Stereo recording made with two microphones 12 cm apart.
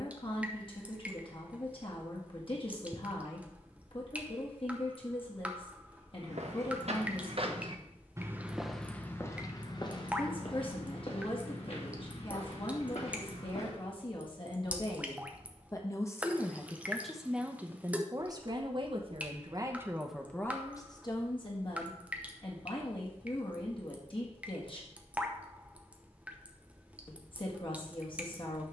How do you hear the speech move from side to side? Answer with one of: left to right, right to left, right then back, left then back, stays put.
right then back.